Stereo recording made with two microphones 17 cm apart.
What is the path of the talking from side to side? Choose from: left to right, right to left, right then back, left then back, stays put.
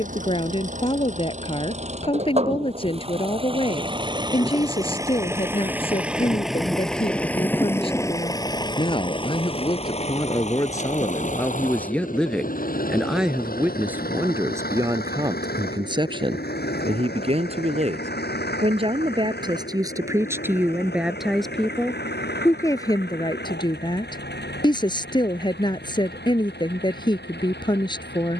right then back.